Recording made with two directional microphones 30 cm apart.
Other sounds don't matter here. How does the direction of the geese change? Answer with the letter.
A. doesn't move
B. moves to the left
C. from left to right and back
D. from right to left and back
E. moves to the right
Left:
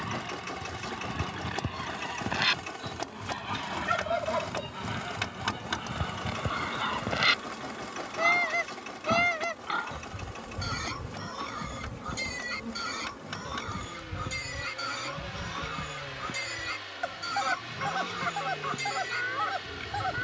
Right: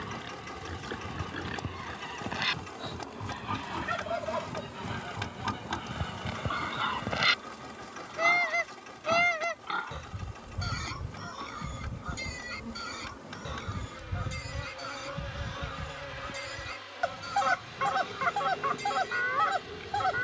E.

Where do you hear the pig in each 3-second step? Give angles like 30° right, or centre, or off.
20° right, 10° right, centre, 20° left, 40° left, 40° left, 40° left.